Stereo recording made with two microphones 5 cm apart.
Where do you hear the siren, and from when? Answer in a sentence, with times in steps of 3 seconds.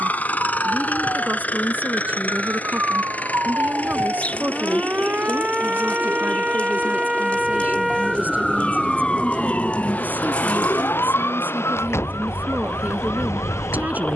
In this clip you hear the siren on the right from 0 s, in the centre from 6 s and on the left from 9 s.